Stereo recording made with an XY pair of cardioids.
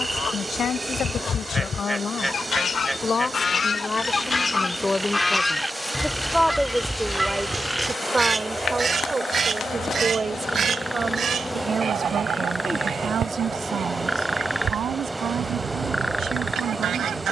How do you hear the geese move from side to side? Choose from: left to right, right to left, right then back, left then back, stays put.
left to right.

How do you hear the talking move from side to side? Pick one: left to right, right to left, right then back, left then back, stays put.
left to right.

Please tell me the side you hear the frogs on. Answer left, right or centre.
centre.